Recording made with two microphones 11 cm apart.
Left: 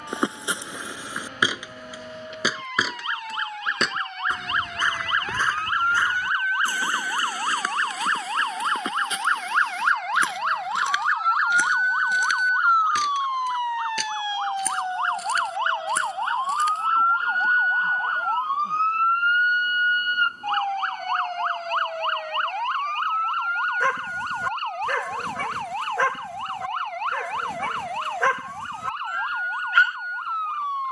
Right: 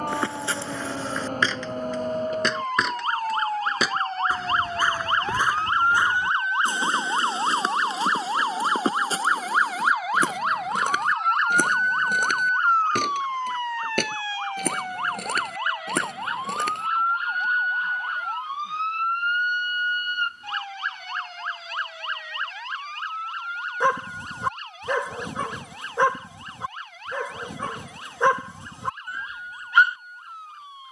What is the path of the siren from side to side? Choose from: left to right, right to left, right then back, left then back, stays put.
right to left.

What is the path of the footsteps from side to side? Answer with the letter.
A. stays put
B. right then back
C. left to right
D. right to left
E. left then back
C.